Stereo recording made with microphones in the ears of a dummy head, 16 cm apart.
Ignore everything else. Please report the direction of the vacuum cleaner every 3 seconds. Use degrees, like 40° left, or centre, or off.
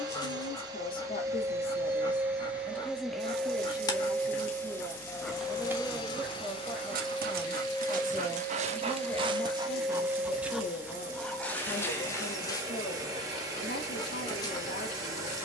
20° right, 10° left, 20° left, 10° right, 20° right.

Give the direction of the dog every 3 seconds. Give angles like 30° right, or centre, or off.
20° left, 10° left, 40° right, 10° right, 20° left.